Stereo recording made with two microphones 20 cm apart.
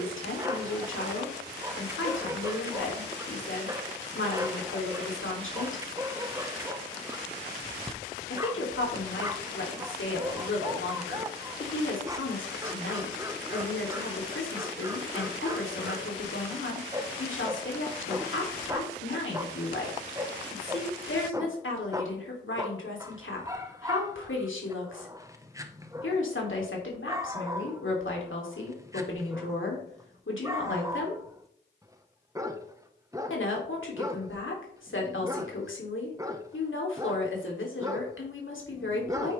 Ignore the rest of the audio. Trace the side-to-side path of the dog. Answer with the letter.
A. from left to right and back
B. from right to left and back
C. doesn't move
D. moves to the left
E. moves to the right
C.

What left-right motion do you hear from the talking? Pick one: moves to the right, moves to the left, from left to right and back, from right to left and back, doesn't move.
doesn't move.